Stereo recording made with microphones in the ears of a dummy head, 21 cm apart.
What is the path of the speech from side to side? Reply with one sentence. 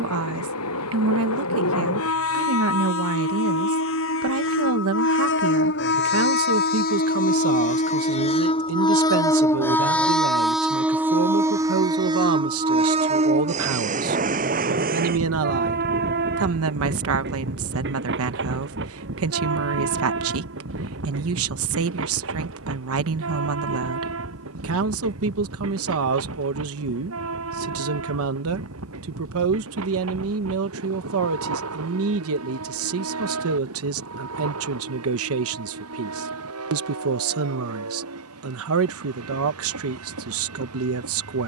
You can hear the speech stay in one place.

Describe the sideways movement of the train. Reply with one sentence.
You can hear the train move from left to right.